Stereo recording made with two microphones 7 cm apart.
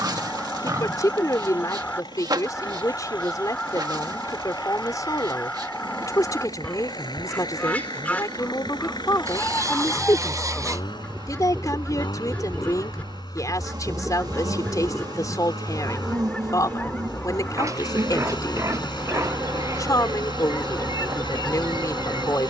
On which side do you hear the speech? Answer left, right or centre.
left.